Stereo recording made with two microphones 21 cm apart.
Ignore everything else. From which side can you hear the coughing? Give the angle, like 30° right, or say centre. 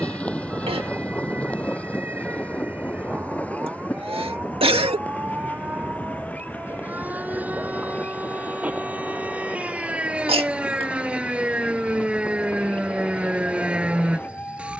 30° right.